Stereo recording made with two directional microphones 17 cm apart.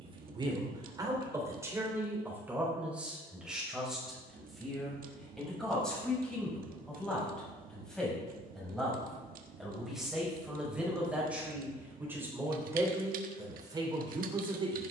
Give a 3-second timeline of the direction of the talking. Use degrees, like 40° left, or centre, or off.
20° right, centre, centre, 10° right, 20° right.